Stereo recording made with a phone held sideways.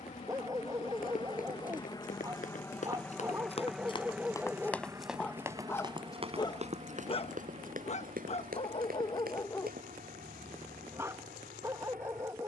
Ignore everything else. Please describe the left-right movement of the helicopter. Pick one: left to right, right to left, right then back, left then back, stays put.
left to right.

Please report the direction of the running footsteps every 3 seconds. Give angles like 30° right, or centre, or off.
60° left, 10° left, 60° right, 70° right.